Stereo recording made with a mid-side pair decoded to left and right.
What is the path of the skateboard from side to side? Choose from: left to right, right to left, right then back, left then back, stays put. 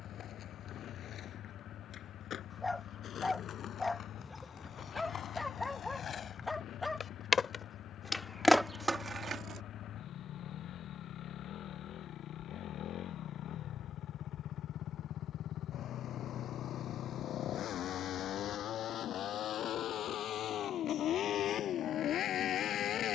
left to right.